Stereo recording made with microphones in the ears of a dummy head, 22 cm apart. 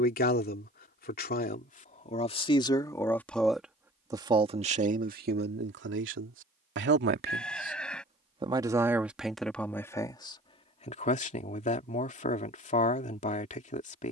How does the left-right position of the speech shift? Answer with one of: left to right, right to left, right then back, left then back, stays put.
right then back.